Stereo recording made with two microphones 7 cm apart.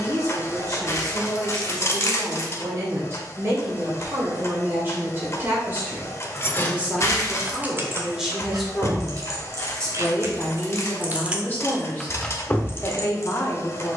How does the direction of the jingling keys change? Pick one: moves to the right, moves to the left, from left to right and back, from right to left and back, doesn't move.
from left to right and back.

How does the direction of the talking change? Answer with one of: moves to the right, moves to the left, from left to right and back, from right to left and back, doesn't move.
moves to the left.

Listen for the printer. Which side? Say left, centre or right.
left.